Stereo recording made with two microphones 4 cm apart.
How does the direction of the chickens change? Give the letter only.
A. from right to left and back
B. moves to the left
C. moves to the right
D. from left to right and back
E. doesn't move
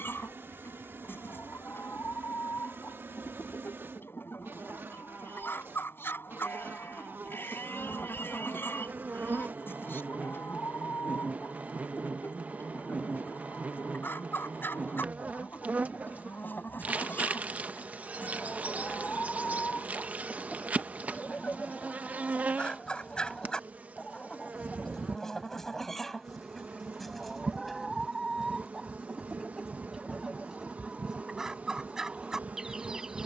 C.